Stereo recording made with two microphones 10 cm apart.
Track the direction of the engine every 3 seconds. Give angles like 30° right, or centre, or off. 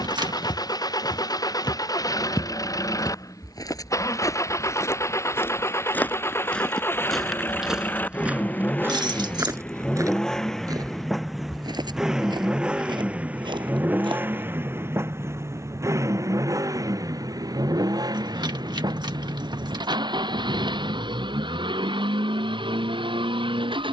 40° left, 40° left, 20° left, centre, 20° right, 40° right, 50° right, 60° right.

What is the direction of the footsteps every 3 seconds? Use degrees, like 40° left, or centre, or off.
50° left, 30° left, centre, 40° right, 60° right, off, off, off.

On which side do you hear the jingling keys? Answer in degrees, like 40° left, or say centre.
50° right.